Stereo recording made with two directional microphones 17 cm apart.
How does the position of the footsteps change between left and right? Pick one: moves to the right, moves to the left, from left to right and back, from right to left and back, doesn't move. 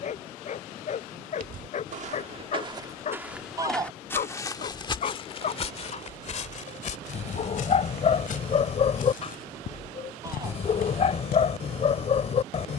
moves to the left.